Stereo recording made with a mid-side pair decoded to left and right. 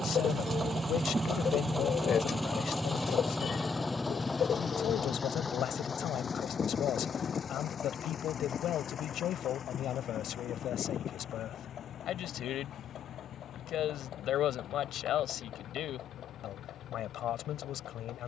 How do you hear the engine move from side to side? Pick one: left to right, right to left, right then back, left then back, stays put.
right to left.